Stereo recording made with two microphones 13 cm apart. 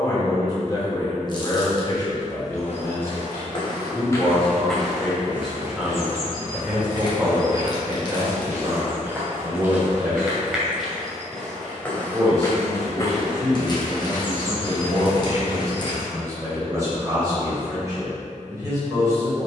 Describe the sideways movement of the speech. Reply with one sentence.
You can hear the speech move to the right.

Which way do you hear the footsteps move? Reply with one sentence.
You can hear the footsteps go right and come back.